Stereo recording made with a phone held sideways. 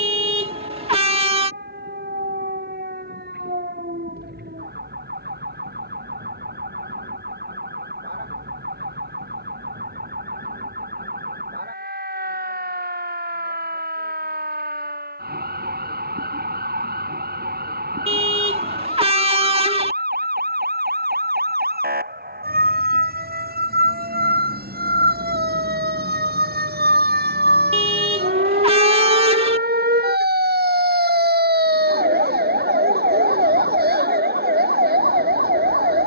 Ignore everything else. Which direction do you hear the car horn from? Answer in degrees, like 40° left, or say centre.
40° right.